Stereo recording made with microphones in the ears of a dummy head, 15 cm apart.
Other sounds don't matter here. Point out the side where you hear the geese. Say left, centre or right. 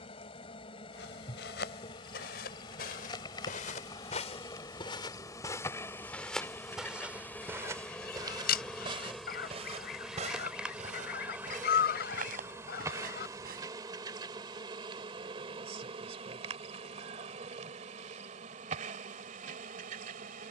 left.